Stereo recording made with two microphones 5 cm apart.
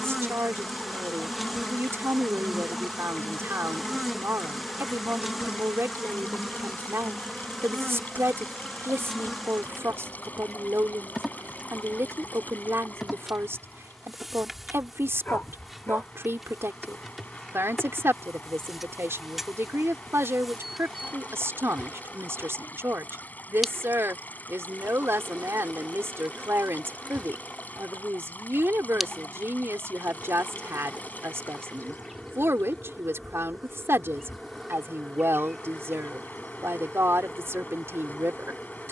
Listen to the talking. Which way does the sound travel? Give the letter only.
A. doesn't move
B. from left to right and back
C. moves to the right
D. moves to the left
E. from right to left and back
A.